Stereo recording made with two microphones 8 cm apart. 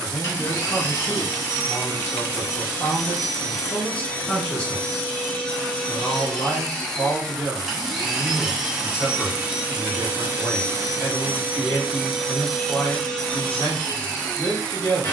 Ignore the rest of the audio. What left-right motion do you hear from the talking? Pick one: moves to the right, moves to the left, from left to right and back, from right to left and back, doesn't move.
doesn't move.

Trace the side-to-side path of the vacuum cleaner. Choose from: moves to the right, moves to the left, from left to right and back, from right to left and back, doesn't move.
from left to right and back.